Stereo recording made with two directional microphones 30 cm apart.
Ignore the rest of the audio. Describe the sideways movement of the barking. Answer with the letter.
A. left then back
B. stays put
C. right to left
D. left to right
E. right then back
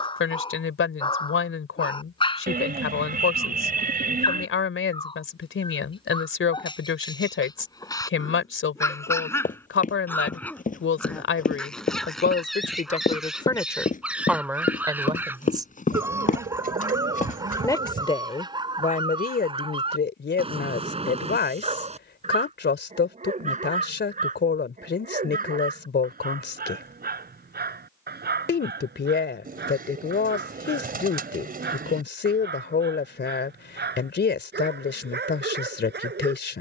D.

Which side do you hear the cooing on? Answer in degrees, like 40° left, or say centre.
30° right.